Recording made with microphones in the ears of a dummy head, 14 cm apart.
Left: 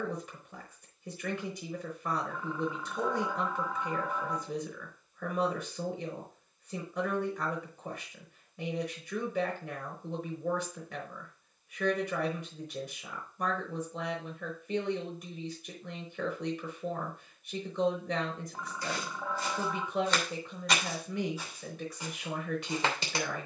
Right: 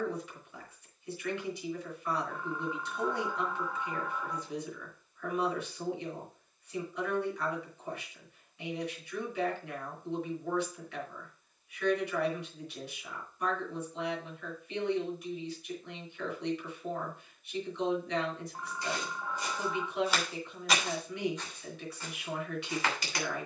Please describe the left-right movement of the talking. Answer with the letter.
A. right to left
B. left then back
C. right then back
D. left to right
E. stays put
E.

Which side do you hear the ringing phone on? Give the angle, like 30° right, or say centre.
70° left.